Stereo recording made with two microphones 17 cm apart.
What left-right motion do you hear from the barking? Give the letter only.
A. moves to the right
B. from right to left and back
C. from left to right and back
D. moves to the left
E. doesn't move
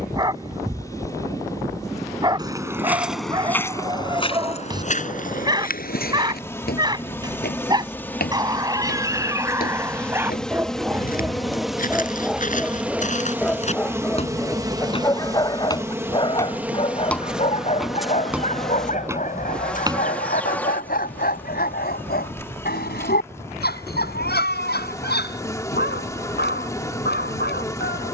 D.